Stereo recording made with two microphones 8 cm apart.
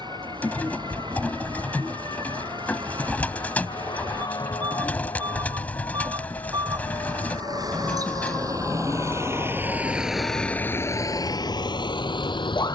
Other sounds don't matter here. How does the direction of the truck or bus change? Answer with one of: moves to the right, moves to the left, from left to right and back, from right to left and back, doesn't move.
moves to the left.